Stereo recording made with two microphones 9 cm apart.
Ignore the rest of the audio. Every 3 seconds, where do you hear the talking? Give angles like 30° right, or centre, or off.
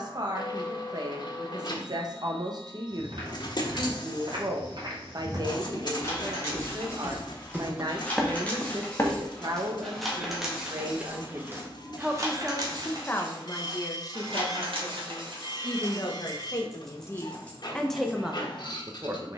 50° right, 50° right, 50° right, 40° right, 30° left, 30° left, 20° right.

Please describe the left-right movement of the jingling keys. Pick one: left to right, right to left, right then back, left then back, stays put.
right then back.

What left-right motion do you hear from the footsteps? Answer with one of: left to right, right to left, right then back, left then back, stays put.
right to left.